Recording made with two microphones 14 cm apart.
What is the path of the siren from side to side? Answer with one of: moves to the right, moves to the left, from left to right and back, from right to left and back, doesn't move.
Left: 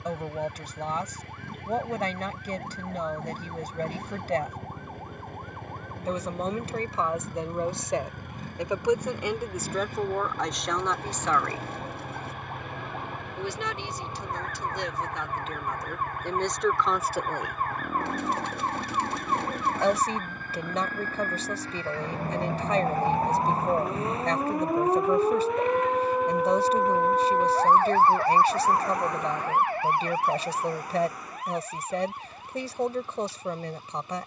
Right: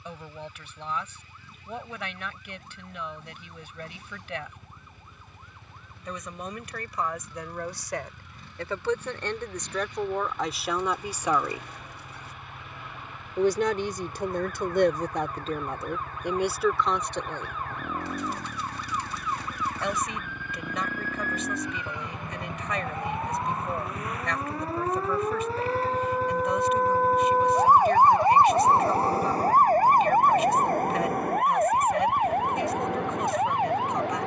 moves to the right.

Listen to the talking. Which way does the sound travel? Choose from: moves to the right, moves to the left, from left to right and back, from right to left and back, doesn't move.
from left to right and back.